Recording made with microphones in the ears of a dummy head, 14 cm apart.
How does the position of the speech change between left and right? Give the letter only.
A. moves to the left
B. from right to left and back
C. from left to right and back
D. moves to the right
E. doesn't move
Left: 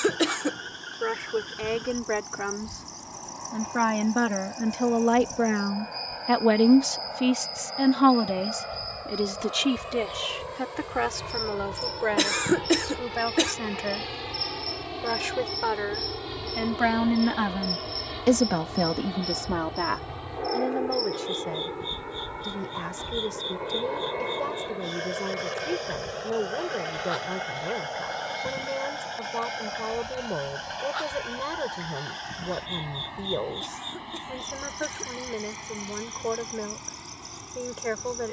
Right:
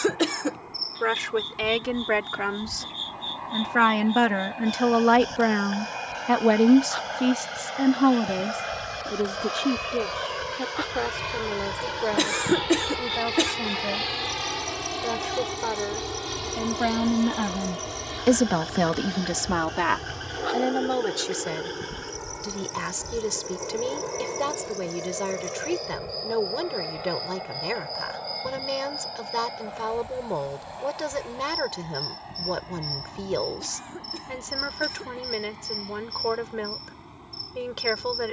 B.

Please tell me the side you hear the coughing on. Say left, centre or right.
centre.